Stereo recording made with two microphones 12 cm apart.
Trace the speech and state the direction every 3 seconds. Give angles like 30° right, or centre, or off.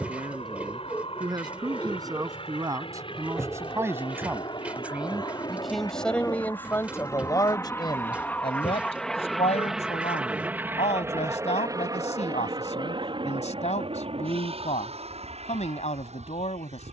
30° right, 10° right, 30° left, 70° left, 70° left, 70° left.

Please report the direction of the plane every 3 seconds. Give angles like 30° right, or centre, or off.
60° left, 40° left, 20° left, 10° right, 40° right, 60° right.